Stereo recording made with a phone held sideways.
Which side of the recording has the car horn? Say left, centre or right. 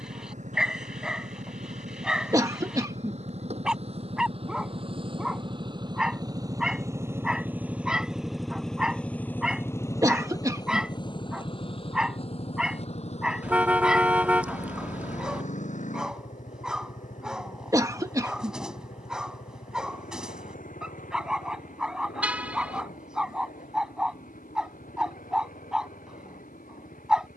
centre.